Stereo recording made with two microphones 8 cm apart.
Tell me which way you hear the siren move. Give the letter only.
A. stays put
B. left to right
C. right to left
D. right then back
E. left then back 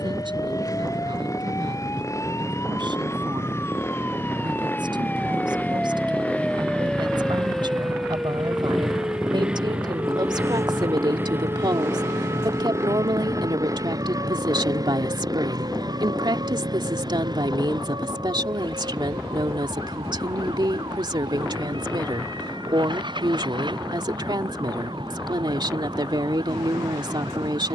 B.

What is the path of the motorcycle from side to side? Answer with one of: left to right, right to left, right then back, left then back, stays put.
left to right.